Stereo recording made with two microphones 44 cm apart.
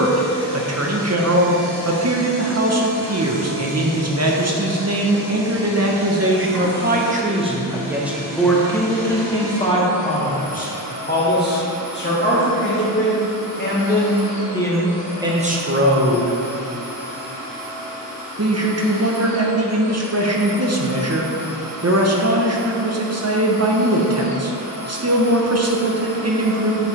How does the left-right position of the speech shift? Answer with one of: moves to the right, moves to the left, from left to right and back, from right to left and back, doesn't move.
from right to left and back.